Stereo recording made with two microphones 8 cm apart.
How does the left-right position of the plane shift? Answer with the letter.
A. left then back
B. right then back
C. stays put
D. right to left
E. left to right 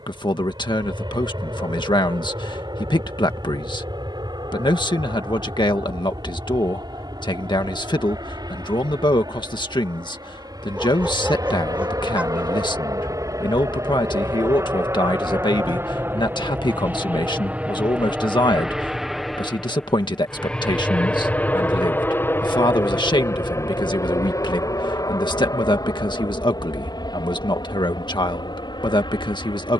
D.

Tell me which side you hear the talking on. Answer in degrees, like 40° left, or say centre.
70° left.